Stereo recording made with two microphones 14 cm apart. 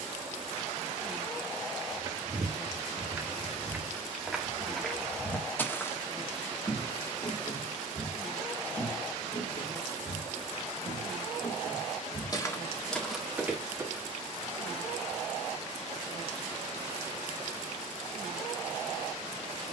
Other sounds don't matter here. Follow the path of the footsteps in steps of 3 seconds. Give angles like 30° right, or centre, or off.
30° right, centre, 40° left, 60° left, 10° left, off, off.